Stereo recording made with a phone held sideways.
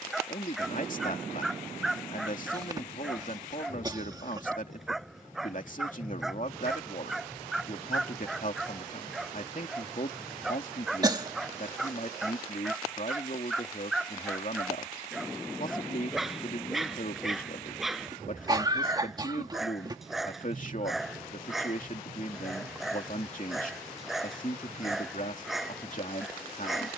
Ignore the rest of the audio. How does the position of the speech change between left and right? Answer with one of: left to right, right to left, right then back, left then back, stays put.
stays put.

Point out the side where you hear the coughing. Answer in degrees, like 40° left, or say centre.
20° right.